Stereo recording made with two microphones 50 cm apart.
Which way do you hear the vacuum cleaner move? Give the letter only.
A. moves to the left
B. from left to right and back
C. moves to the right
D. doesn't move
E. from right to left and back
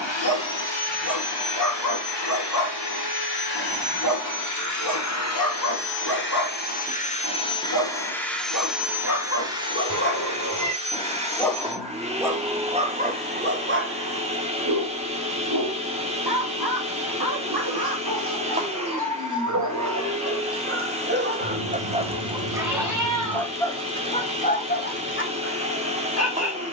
C.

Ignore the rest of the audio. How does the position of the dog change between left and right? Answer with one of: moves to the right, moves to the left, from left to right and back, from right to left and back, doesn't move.
from left to right and back.